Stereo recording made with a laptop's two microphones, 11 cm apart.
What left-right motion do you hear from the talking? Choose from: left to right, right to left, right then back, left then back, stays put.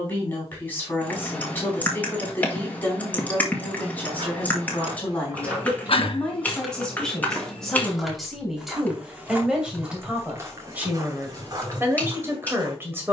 left to right.